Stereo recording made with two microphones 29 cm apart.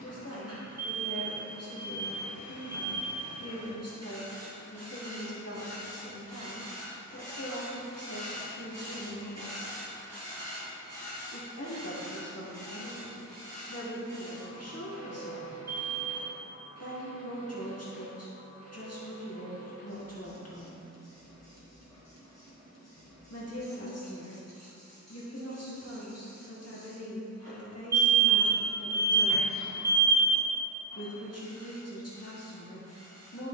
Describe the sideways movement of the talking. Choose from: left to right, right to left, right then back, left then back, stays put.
stays put.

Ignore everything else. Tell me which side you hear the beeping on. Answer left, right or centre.
right.